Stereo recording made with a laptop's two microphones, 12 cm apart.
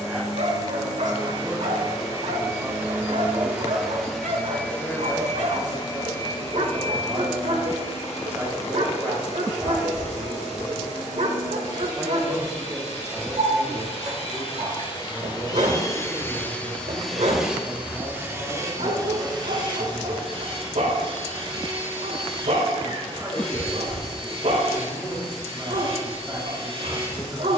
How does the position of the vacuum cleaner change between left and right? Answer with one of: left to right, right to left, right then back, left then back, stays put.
left then back.